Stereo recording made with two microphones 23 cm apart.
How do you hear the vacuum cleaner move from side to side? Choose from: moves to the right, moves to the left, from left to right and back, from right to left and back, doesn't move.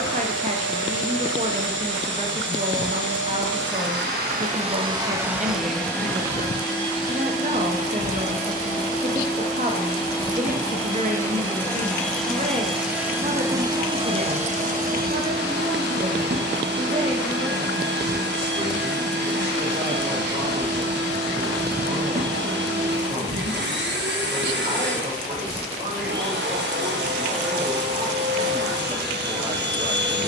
from right to left and back.